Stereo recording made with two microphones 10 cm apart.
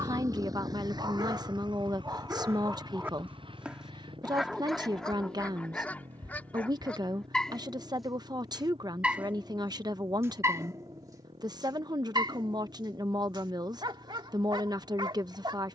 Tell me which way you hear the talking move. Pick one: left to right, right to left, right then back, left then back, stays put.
stays put.